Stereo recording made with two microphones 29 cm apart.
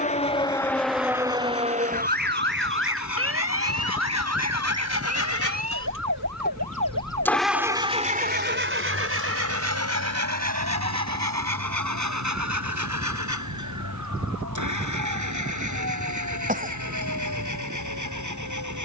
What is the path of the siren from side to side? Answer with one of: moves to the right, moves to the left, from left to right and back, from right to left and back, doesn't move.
moves to the right.